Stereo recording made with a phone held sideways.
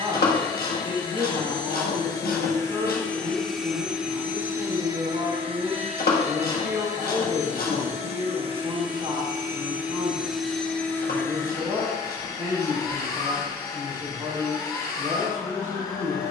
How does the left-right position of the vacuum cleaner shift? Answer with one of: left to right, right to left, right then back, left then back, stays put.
right then back.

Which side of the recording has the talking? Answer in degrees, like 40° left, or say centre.
40° right.